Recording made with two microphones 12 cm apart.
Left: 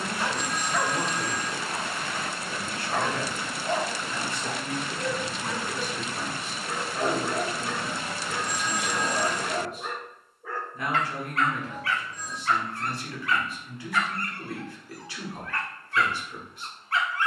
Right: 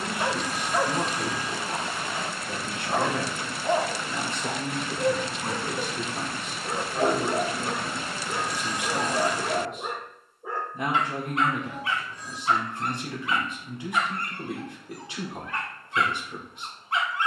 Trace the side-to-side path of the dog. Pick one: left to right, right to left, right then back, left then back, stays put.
stays put.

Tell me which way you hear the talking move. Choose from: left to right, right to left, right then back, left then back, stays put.
stays put.